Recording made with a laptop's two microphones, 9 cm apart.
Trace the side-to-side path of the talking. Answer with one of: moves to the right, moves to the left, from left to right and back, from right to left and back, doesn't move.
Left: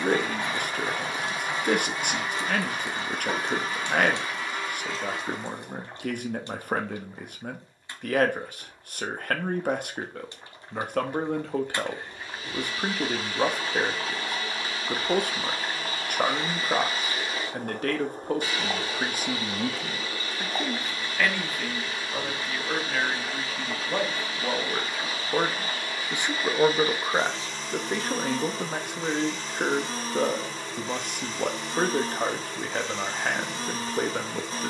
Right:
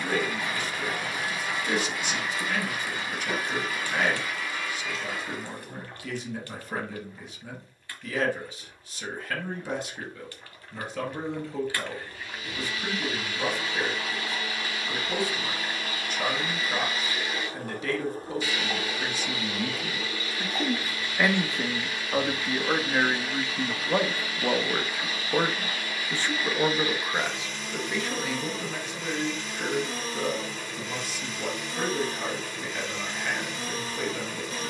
from left to right and back.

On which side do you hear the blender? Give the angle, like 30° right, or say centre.
30° left.